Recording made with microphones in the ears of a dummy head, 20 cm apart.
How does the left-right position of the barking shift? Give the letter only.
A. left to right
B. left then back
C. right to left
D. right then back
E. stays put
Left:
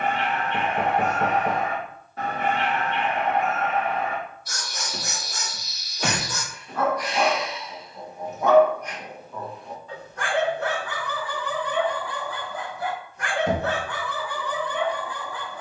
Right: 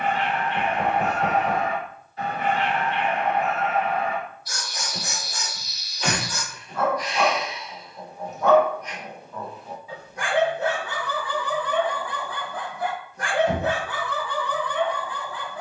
D.